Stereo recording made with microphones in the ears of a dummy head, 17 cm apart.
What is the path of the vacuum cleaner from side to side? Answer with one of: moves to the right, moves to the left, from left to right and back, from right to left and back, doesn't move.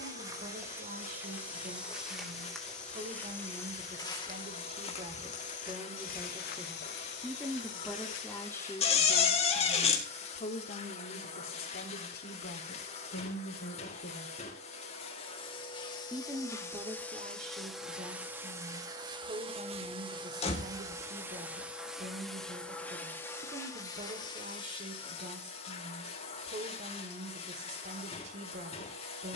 from left to right and back.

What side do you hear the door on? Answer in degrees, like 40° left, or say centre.
30° left.